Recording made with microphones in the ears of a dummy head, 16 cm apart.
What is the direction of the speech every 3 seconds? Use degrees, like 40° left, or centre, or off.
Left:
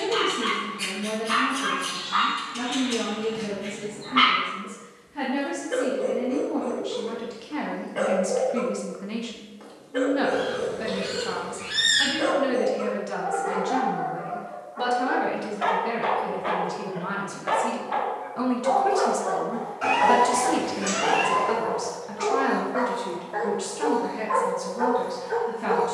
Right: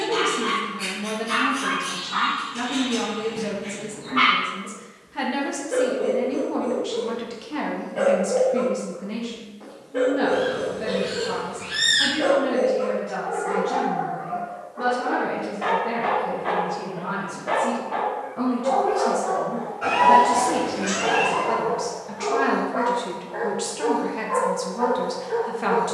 40° right, 40° right, 10° right, 40° left, 70° left, 70° left, 40° left, centre, 30° right.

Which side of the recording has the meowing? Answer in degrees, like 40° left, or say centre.
40° left.